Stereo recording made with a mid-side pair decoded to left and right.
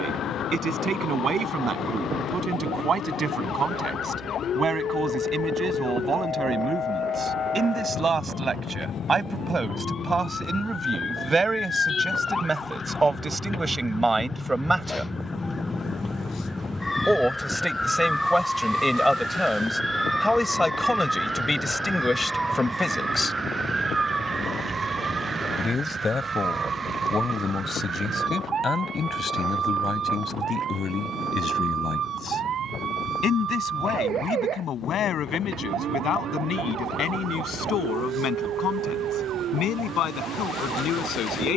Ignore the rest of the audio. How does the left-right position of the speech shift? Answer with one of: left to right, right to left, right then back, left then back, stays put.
right to left.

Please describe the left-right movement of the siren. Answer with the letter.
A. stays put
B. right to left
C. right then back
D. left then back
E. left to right
E.